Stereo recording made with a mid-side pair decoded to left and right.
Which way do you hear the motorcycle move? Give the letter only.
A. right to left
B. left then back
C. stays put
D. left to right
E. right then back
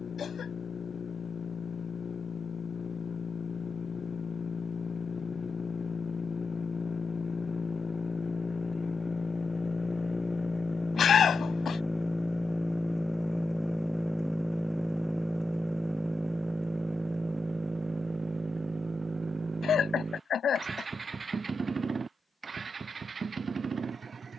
D.